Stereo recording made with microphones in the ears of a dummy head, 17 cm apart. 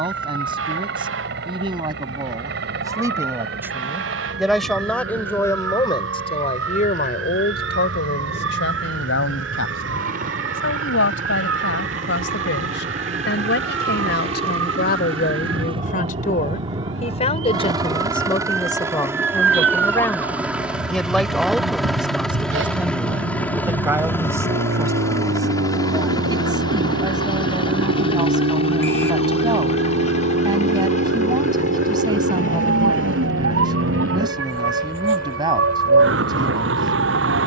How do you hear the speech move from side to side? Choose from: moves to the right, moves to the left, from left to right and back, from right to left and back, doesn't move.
from right to left and back.